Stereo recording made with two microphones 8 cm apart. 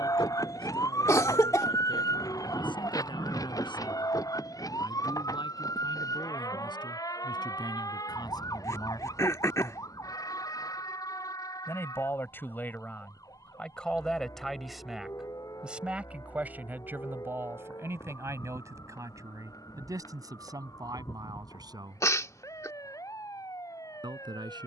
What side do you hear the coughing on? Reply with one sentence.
In this clip you hear the coughing on the left.